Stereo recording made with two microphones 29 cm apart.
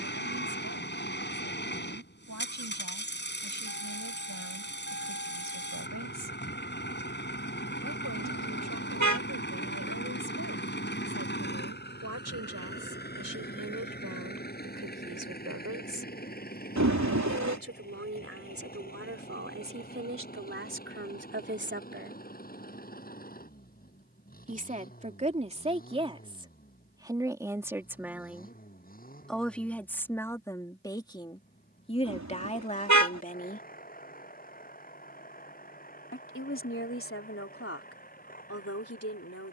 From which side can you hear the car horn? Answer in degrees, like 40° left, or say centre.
70° right.